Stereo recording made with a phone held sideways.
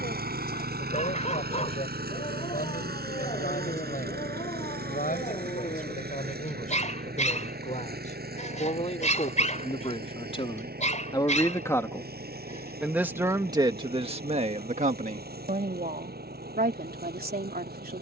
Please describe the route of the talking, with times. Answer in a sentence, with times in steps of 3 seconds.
In this clip you hear the talking on the left from 0 s and on the right from 12 s.